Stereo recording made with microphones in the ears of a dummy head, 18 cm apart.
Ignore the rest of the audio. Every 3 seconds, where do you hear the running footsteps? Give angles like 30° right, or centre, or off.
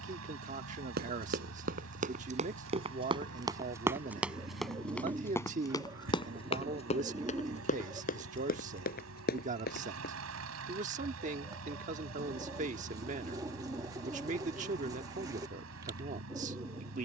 40° right, centre, 40° left, 50° left, off, off.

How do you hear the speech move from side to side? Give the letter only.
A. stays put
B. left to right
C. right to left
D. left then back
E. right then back
A.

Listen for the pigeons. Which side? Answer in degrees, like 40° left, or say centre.
20° right.